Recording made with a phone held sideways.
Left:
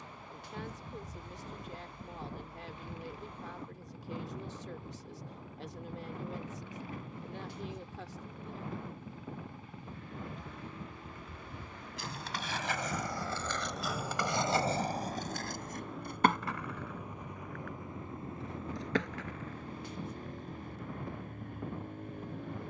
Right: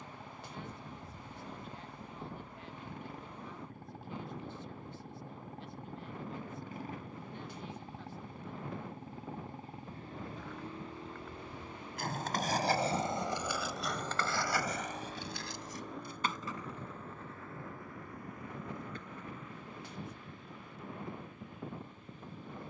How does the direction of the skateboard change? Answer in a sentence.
You can hear the skateboard move from right to left.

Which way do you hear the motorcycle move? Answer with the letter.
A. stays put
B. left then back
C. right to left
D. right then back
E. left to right
C.